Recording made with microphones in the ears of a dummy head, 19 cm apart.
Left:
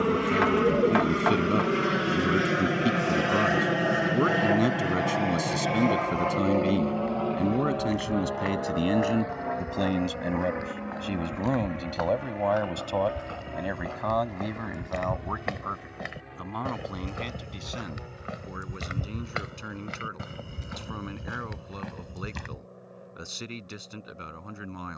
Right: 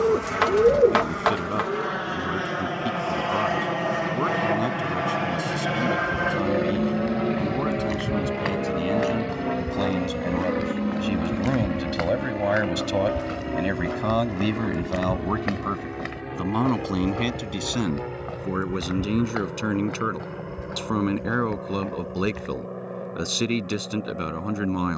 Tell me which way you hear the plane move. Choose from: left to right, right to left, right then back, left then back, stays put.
left to right.